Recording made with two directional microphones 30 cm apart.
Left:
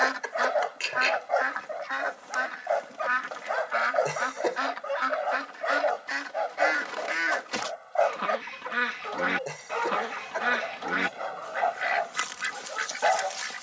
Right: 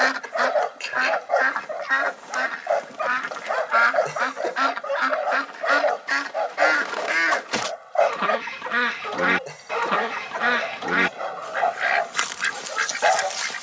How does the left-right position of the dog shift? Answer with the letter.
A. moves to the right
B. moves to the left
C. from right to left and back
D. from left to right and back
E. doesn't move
E.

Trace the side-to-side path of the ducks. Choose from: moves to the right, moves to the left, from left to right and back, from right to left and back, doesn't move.
doesn't move.